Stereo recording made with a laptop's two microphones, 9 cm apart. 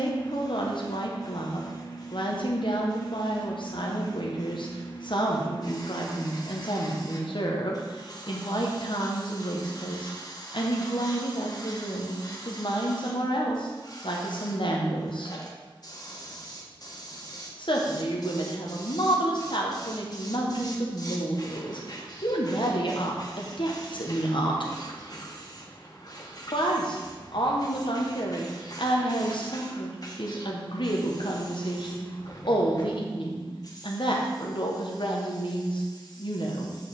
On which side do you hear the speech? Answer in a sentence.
You can hear the speech on the left.